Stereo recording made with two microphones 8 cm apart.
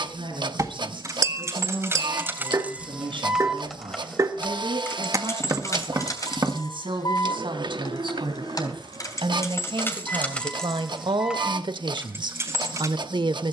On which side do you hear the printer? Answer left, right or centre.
right.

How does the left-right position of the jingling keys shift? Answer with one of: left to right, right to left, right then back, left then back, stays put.
left then back.